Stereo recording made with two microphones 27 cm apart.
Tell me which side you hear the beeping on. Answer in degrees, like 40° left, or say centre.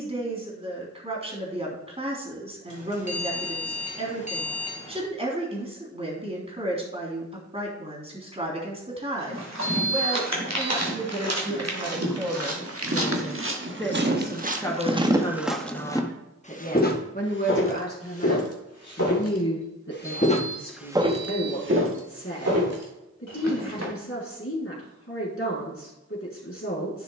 30° left.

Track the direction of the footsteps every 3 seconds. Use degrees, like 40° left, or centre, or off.
off, off, off, 70° right, 50° right, 20° left, 40° left, 60° right, off.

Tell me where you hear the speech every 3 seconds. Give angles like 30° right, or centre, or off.
20° right, 20° right, 20° right, 20° right, centre, 30° left, 50° left, 50° left, 50° left.